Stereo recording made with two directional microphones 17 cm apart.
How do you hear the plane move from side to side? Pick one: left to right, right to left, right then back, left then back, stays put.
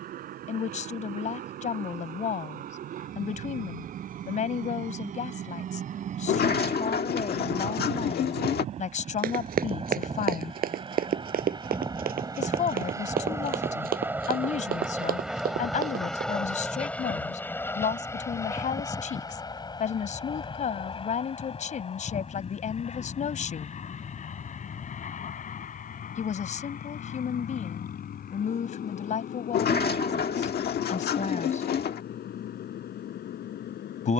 right to left.